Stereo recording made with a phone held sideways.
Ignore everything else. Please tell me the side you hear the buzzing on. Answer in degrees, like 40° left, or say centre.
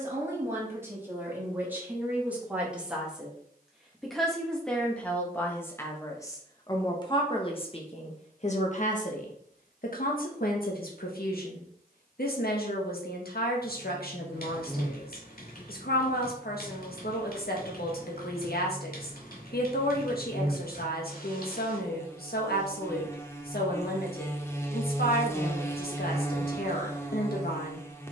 20° left.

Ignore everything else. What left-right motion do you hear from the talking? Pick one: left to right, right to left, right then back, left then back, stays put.
right to left.